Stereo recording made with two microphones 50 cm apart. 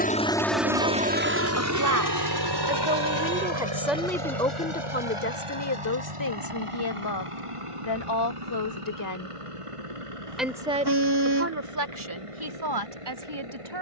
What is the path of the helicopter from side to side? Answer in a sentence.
In this clip you hear the helicopter move to the right.